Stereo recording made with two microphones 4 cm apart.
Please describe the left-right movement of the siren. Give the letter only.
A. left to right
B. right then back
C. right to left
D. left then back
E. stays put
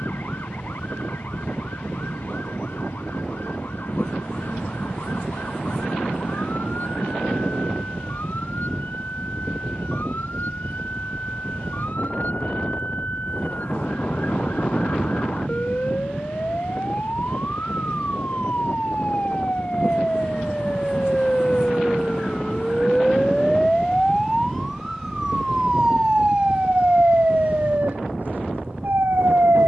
A.